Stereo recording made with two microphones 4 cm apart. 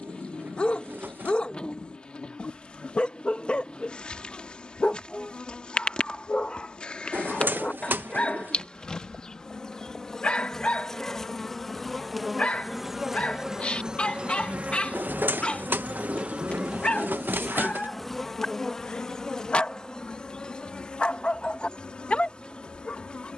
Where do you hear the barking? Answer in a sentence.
In this clip you hear the barking on the left.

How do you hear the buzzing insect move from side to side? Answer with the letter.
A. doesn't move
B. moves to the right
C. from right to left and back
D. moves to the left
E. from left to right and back
E.